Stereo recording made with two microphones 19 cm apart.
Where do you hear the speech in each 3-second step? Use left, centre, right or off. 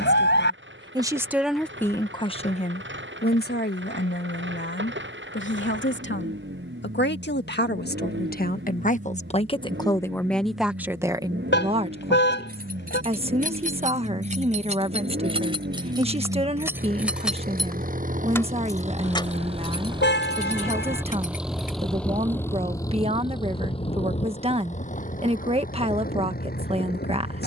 centre, left, left, centre, right, right, right, right, right.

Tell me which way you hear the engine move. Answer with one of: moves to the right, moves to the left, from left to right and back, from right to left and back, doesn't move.
moves to the left.